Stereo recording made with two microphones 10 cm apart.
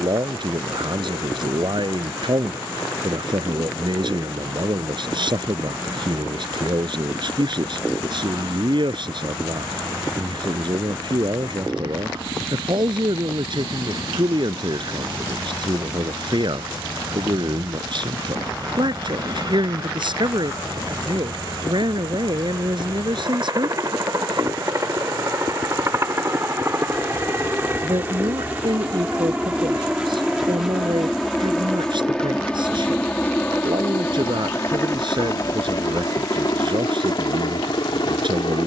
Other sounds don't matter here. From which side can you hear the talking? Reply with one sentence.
In this clip you hear the talking on the right.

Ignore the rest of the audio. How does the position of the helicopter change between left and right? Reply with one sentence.
In this clip you hear the helicopter move to the left.